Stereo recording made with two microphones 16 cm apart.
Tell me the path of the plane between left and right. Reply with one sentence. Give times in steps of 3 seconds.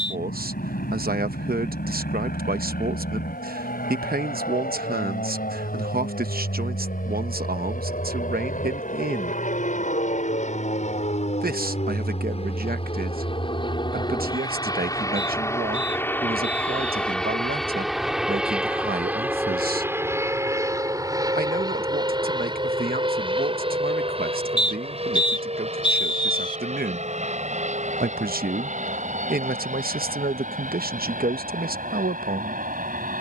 In this clip you hear the plane on the left from 0 s, in the centre from 15 s and on the right from 21 s.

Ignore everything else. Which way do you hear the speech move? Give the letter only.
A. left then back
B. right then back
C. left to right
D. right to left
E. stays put
E.